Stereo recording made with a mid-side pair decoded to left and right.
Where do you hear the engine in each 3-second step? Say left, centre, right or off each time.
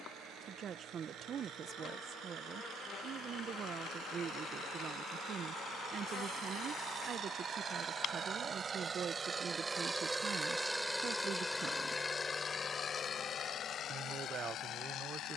right, right, right, centre, left.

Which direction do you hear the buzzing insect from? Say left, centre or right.
left.